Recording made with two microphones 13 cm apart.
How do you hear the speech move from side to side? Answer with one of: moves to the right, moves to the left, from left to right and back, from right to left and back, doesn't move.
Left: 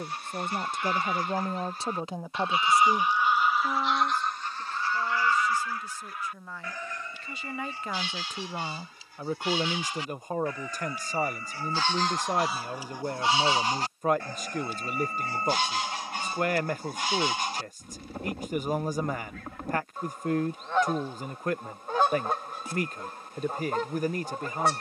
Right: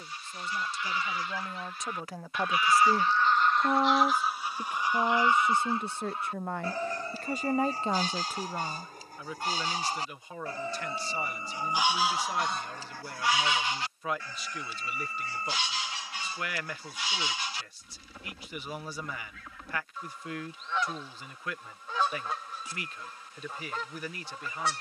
from left to right and back.